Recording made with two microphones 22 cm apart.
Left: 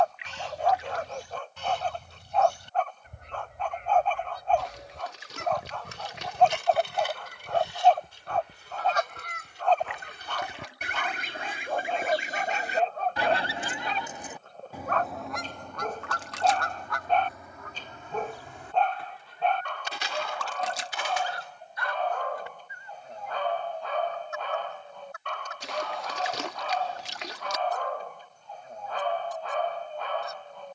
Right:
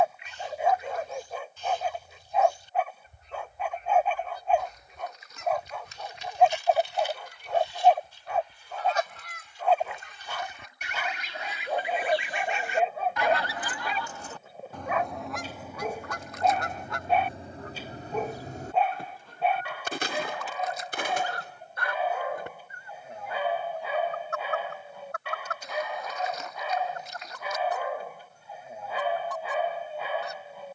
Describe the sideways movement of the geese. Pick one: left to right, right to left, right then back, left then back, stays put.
left to right.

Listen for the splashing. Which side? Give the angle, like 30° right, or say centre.
90° left.